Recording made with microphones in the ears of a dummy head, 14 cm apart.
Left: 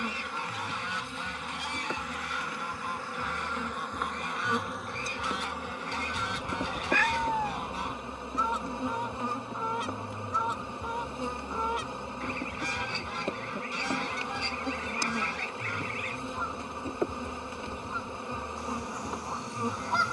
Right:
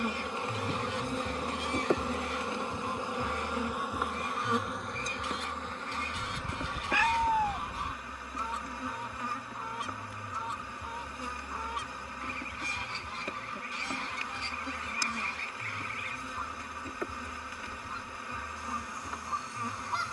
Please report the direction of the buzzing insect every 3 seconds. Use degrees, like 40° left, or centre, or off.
20° right, centre, 20° left, 20° left, 20° left, 20° left, 20° left.